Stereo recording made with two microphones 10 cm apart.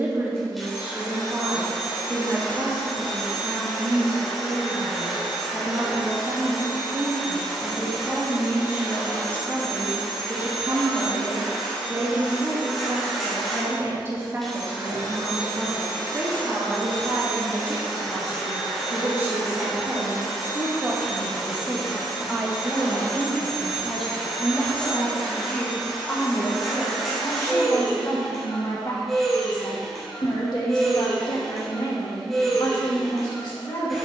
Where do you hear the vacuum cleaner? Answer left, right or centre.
centre.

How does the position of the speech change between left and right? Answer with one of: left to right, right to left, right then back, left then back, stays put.
right to left.